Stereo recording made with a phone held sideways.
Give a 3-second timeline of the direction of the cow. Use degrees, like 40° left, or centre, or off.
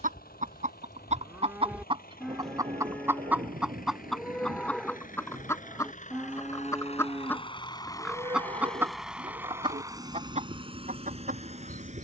20° right, centre, 30° right, 50° right.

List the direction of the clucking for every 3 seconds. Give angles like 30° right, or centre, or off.
40° right, centre, 10° left, 50° right.